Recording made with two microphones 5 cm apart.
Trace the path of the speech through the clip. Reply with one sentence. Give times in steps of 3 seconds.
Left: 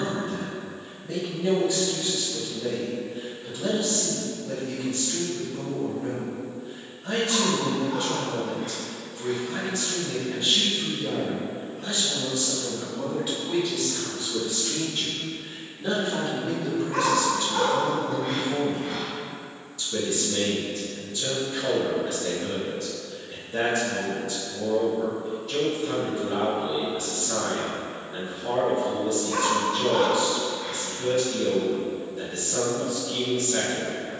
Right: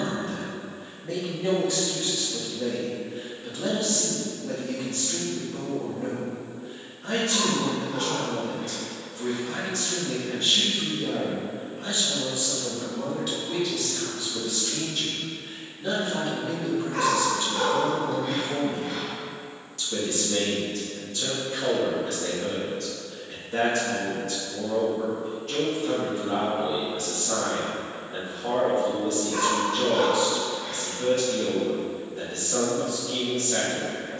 In this clip you hear the speech on the right from 0 s, in the centre from 12 s and on the right from 18 s.